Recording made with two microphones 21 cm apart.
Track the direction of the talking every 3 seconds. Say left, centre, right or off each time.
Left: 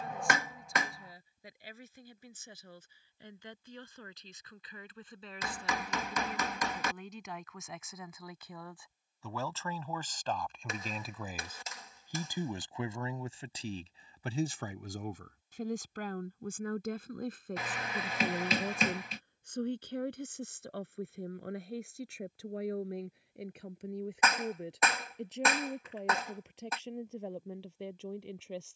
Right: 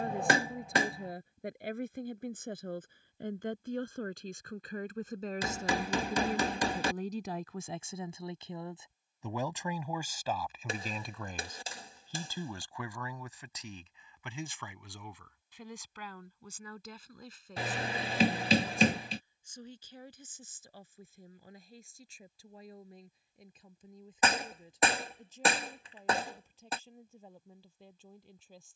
right, right, right, centre, left, left, left, left, left, left.